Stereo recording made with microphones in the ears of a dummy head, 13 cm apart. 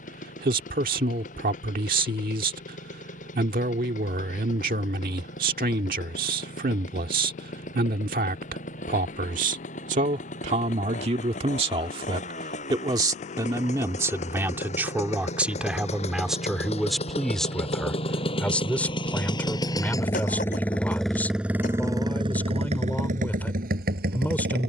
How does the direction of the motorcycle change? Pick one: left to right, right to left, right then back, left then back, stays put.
left to right.